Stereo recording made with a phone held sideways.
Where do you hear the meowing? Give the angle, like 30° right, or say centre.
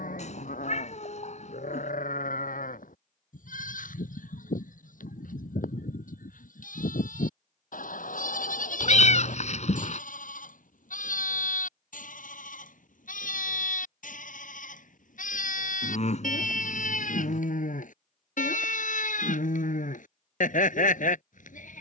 50° left.